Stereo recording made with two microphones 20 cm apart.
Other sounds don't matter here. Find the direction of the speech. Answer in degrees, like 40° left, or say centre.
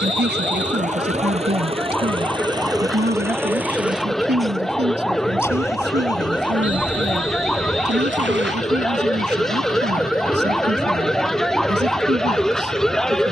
60° right.